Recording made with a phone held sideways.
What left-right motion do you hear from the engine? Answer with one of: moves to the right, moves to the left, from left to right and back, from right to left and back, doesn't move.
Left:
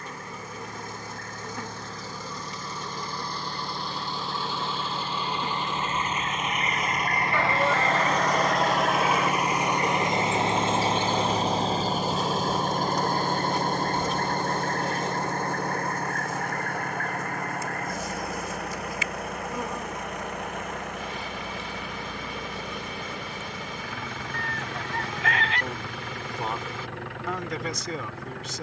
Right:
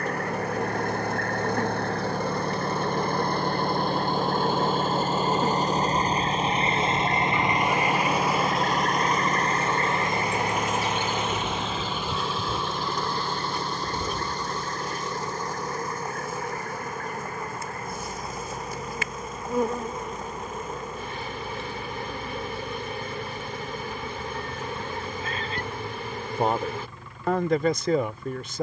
moves to the left.